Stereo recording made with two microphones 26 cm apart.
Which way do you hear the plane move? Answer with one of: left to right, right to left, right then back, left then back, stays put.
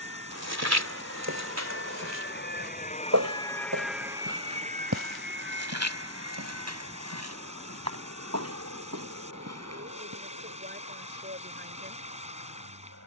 left to right.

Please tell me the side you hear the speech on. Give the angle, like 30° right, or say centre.
40° right.